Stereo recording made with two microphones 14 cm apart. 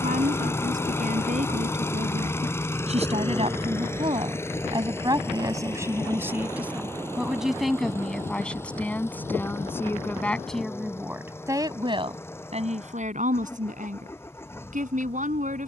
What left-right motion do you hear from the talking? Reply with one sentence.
You can hear the talking move from right to left and back again.